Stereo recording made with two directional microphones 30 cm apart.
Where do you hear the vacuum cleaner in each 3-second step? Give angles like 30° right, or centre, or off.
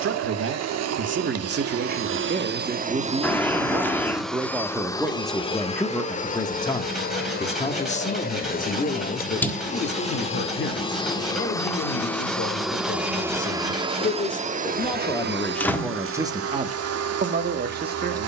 50° right, centre, 30° left, 20° left, 10° right, 50° right.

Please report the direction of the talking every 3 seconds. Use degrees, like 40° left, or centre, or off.
40° right, 10° right, 20° left, 40° left, 30° left, 10° right.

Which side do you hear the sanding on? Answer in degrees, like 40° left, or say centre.
centre.